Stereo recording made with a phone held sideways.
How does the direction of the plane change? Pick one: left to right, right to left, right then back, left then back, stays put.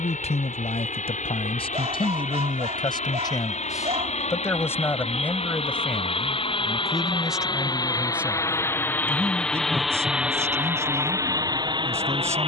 left to right.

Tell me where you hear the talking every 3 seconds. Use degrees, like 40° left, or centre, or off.
40° left, 20° left, centre, 20° right.